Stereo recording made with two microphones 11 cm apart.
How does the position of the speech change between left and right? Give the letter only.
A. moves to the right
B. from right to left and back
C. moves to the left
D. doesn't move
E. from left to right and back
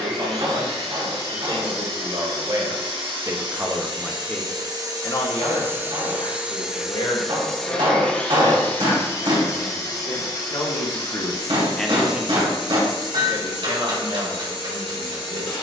B.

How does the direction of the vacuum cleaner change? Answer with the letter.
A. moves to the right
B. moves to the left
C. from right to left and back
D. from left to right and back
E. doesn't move
B.